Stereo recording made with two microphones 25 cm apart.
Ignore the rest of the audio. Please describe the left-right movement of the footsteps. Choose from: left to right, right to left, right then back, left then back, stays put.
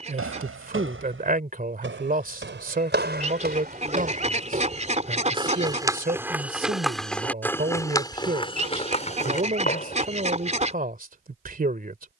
right to left.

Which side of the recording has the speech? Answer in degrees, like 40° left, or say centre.
40° right.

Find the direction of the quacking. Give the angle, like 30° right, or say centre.
30° right.